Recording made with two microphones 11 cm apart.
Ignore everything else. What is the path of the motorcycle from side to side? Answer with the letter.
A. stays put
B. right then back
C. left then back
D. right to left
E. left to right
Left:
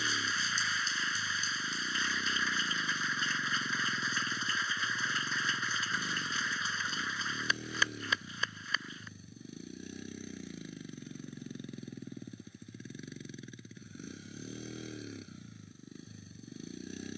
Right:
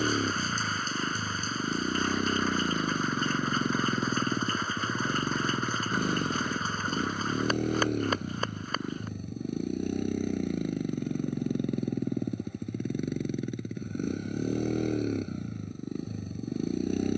A.